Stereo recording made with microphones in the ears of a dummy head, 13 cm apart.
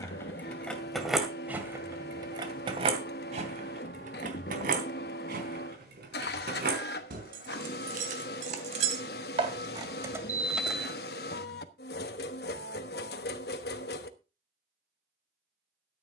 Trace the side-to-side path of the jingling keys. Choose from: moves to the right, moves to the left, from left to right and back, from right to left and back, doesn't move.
from left to right and back.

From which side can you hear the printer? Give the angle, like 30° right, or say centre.
80° left.